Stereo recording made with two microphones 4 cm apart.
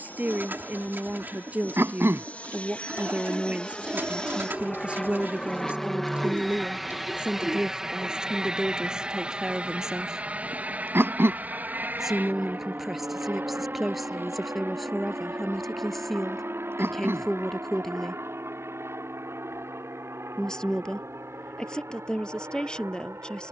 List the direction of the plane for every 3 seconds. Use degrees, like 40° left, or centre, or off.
40° left, 20° left, 10° right, 30° right, 50° right, 60° right, 60° right, 70° right.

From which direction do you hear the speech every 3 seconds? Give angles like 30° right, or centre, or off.
40° right, 30° right, 20° right, 10° right, centre, centre, 10° left, 20° left.